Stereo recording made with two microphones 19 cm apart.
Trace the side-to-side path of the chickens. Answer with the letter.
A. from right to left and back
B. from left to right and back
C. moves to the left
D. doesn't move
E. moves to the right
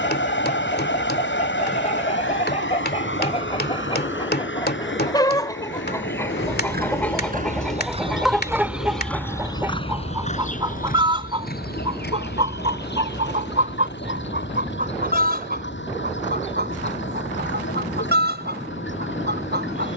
E.